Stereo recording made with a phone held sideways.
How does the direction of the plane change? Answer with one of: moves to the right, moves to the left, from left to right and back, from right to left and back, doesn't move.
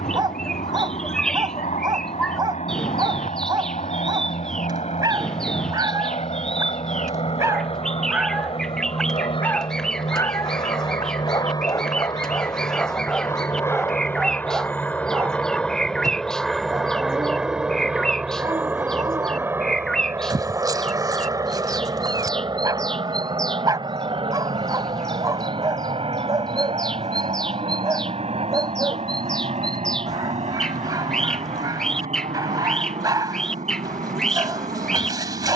moves to the right.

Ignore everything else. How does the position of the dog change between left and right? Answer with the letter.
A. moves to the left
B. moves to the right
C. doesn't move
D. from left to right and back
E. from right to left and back
E.